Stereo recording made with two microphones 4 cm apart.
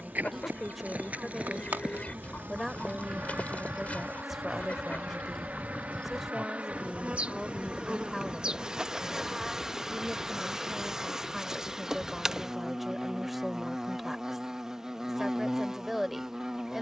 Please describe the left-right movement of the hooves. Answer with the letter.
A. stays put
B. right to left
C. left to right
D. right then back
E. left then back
B.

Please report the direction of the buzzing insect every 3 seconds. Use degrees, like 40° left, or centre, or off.
50° right, 50° right, 30° right, 10° right, 10° right, 10° right.